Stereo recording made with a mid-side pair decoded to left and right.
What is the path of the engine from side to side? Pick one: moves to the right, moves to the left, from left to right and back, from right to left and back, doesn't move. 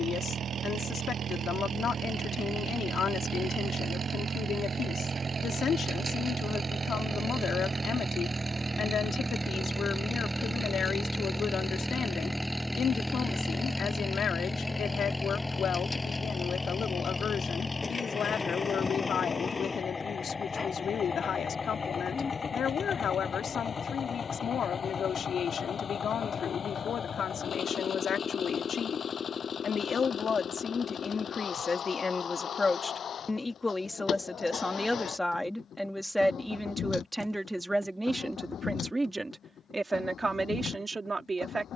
moves to the left.